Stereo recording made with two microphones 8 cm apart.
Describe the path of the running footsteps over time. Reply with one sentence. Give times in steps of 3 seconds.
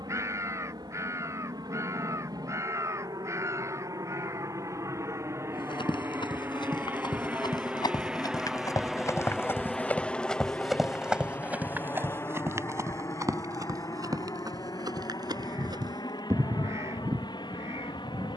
You can hear the running footsteps not at all from 0 s, on the left from 3 s, in the centre from 9 s and on the right from 12 s.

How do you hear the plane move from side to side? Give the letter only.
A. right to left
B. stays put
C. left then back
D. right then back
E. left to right
A.